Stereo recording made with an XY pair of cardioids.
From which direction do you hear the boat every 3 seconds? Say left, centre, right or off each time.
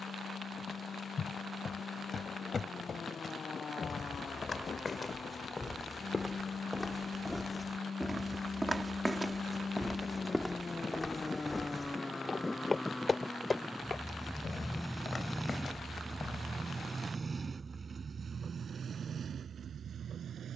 left, left, left, left, centre, right, right.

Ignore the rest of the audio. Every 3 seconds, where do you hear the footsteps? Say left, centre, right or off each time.
left, left, centre, centre, left, left, off.